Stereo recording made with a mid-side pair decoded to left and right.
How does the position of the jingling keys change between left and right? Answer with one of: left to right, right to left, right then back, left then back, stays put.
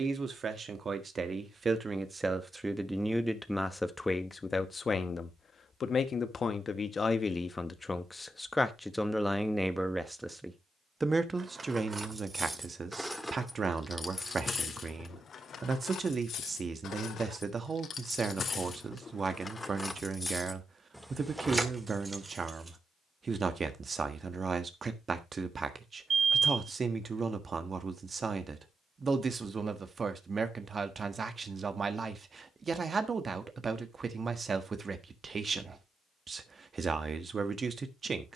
left then back.